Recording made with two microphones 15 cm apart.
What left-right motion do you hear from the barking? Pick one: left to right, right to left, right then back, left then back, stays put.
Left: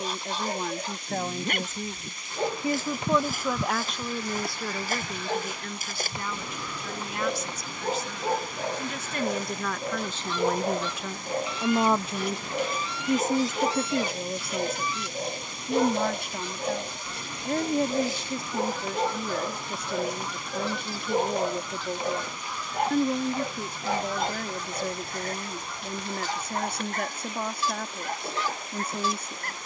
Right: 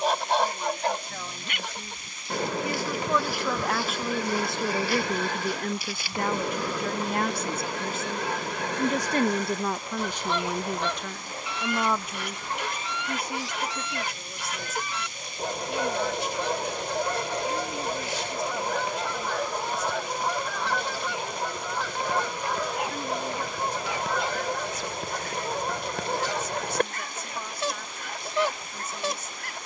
stays put.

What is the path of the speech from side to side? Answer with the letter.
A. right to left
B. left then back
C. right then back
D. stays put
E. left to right
C.